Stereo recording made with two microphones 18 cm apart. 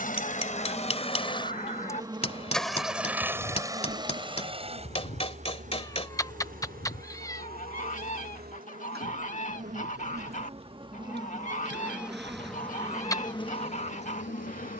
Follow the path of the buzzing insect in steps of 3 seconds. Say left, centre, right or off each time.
centre, right, right, right, left.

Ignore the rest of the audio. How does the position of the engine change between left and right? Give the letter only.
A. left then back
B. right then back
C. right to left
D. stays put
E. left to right
E.